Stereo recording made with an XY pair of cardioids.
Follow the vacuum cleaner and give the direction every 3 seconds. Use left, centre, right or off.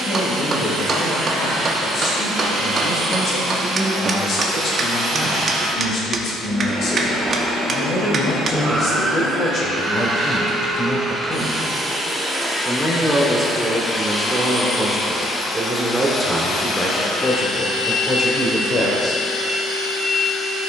right, right, right, right, centre, left, left.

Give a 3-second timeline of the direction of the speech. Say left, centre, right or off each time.
left, left, left, left, centre, centre, left.